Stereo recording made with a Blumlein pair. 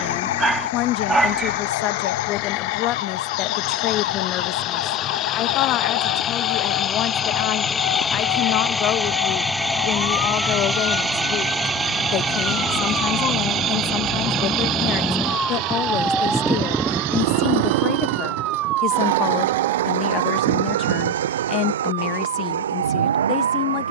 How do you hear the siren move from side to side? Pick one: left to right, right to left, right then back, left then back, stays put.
left to right.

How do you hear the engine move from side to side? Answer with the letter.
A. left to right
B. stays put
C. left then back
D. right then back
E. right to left
A.